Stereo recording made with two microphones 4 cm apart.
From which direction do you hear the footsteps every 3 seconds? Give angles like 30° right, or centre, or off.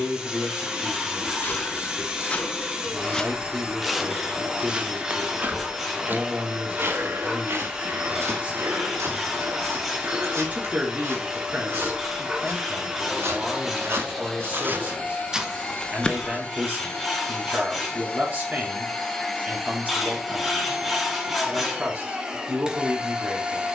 30° left, 10° right, 60° right, 80° right, 60° right, 10° left, off, off.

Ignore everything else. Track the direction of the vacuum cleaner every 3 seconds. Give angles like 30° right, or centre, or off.
20° right, 20° right, 20° right, 20° right, 10° right, 20° left, centre, 20° right.